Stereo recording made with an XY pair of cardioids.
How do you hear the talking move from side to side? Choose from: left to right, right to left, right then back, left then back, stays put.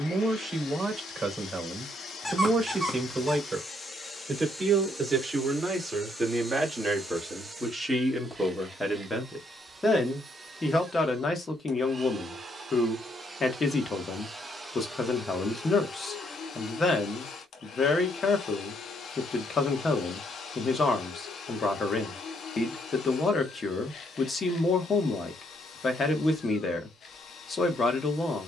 right to left.